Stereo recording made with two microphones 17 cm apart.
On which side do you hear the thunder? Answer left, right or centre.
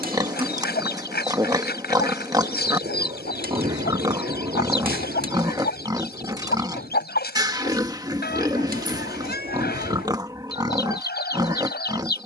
right.